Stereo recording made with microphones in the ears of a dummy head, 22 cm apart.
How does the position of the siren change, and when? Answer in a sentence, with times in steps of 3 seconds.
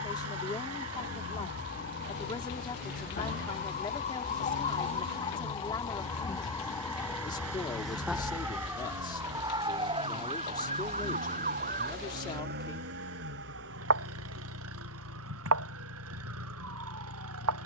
In this clip you hear the siren on the left from 0 s, in the centre from 6 s and on the right from 9 s.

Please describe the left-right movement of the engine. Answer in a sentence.
In this clip you hear the engine stay put.